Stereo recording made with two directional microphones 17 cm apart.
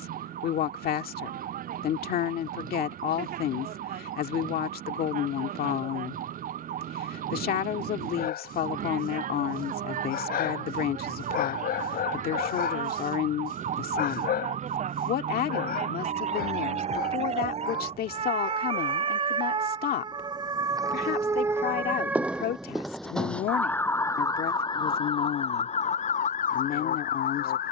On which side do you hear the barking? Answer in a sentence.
In this clip you hear the barking on the left.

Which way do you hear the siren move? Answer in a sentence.
You can hear the siren go from the right side to the left.